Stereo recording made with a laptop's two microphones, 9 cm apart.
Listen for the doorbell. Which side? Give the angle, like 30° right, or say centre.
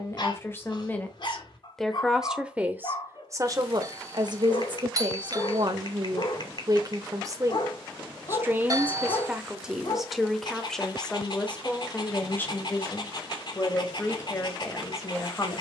40° right.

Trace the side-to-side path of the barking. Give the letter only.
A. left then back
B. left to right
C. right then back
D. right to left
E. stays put
E.